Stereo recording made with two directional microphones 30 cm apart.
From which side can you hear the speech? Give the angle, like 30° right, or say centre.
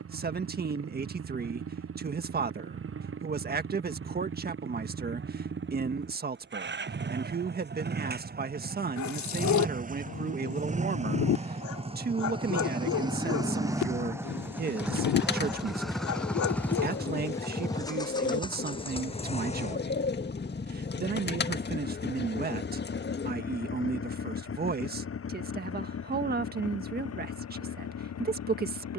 30° right.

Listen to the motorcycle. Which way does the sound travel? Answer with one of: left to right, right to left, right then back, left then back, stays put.
right to left.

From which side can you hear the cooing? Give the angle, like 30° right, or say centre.
30° left.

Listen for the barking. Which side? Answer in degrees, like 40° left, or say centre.
70° left.